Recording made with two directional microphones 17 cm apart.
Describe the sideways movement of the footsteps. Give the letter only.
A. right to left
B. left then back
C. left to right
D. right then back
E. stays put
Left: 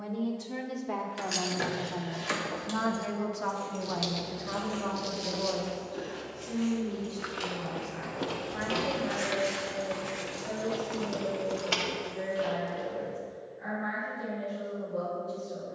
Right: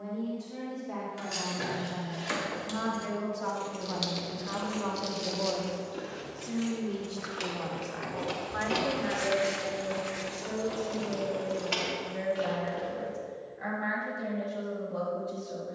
B.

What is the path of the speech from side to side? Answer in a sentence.
You can hear the speech move from left to right.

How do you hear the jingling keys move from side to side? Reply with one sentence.
You can hear the jingling keys move from left to right and back again.